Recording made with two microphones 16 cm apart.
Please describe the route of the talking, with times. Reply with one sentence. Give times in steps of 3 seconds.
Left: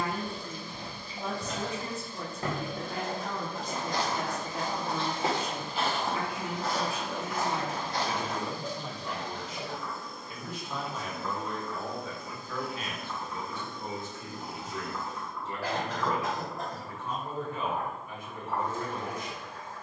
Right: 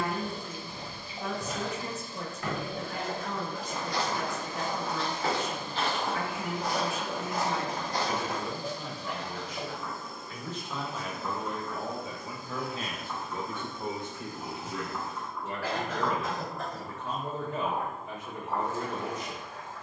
You can hear the talking on the left from 0 s, in the centre from 9 s and on the right from 12 s.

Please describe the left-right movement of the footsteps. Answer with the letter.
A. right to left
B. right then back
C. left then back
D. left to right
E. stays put
C.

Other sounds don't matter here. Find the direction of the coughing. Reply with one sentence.
You can hear the coughing on the left.